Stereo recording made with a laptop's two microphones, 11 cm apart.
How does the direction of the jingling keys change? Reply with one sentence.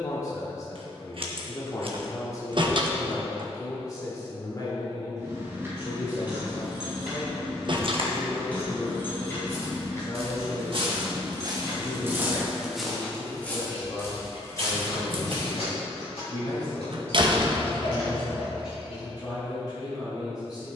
You can hear the jingling keys move from right to left.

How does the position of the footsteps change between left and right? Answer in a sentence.
You can hear the footsteps move from right to left.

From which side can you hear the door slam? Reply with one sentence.
You can hear the door slam on the right.